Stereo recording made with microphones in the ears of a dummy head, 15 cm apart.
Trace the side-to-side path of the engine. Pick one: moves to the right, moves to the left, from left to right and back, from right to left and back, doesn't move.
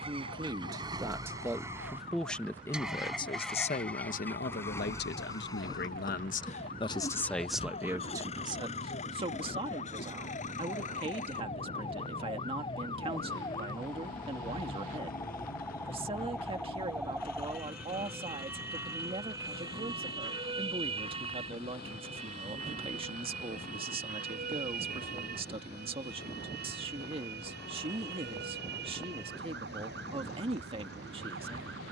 moves to the left.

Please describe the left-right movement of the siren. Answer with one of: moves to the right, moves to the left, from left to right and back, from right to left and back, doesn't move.
moves to the right.